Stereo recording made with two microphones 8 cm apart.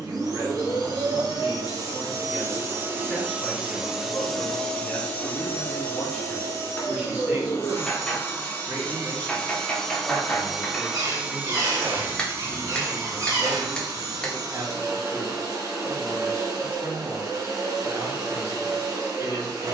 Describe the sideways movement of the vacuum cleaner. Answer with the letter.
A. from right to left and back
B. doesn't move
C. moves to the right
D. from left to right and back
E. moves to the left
A.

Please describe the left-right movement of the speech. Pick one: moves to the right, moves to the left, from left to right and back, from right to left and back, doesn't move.
from right to left and back.